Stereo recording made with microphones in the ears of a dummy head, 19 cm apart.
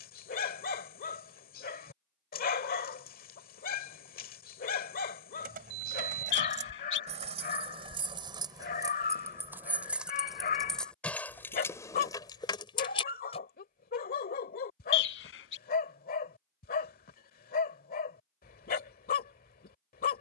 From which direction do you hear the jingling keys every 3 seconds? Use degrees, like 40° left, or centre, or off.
off, 40° right, 30° right, centre, 20° left, off, off.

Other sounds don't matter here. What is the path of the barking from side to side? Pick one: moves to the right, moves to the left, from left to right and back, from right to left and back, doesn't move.
doesn't move.